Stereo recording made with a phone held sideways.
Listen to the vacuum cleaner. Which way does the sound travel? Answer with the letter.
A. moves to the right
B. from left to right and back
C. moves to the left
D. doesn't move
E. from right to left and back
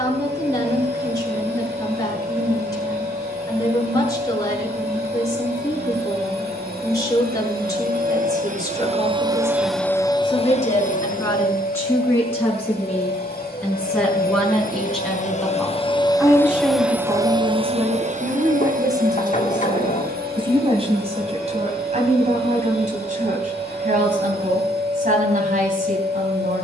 E.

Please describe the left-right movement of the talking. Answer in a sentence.
In this clip you hear the talking move to the right.